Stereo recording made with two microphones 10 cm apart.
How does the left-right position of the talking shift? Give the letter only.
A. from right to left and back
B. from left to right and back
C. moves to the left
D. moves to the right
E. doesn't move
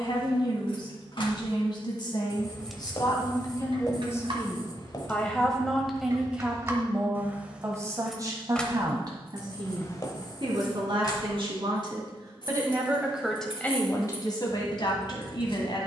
B.